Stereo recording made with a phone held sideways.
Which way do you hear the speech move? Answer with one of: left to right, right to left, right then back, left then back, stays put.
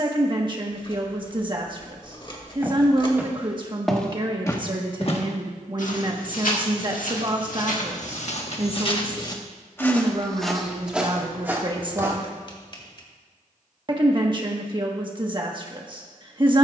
stays put.